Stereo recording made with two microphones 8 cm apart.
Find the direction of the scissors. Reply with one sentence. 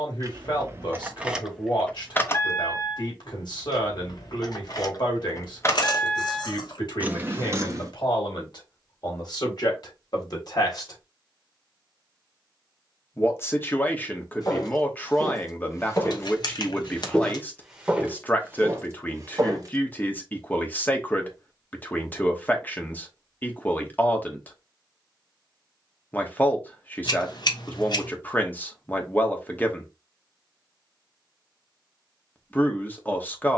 In this clip you hear the scissors on the left.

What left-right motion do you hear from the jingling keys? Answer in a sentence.
You can hear the jingling keys move from right to left and back again.